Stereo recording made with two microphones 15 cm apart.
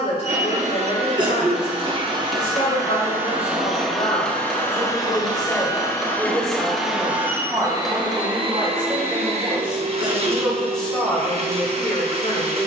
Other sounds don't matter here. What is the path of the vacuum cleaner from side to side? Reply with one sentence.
You can hear the vacuum cleaner move from right to left and back again.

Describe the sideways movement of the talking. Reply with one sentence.
In this clip you hear the talking move from left to right and back again.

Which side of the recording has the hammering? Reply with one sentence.
You can hear the hammering in the centre.